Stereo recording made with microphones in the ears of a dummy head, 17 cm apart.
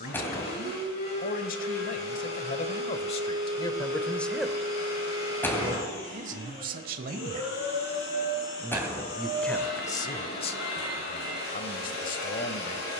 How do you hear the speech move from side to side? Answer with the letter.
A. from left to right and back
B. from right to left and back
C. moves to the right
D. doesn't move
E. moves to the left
A.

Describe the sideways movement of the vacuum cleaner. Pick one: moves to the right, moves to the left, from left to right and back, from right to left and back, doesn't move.
doesn't move.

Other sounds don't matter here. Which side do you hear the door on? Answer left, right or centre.
centre.